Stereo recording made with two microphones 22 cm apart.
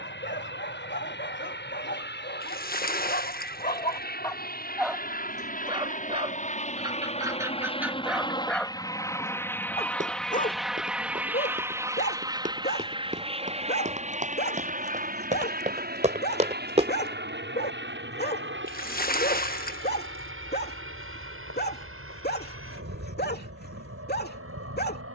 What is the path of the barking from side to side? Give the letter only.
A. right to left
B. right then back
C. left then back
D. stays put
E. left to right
B.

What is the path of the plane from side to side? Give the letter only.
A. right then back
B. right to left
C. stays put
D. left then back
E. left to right
E.